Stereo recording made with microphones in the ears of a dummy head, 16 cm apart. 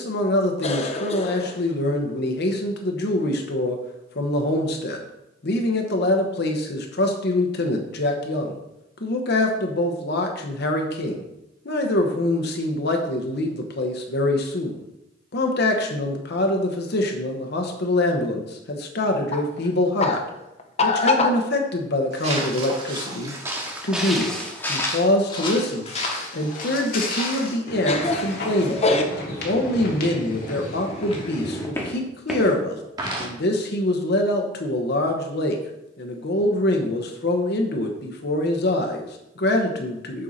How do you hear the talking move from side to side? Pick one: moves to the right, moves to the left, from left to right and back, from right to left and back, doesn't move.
doesn't move.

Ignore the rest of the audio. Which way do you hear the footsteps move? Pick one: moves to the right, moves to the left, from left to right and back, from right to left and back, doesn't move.
from right to left and back.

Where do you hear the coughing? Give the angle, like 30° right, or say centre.
40° left.